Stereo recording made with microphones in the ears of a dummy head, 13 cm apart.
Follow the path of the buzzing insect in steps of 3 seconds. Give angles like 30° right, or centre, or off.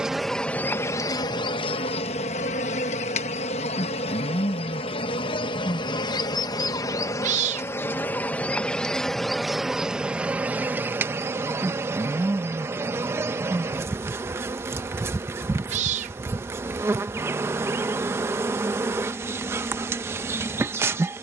30° left, 40° left, 20° left, 10° right, 20° right, 20° right, 20° right.